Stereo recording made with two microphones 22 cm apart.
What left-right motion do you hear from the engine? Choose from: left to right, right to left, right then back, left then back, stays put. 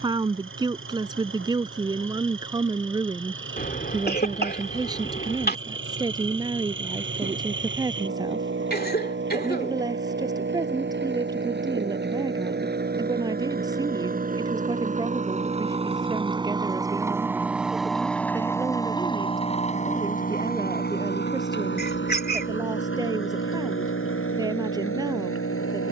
right to left.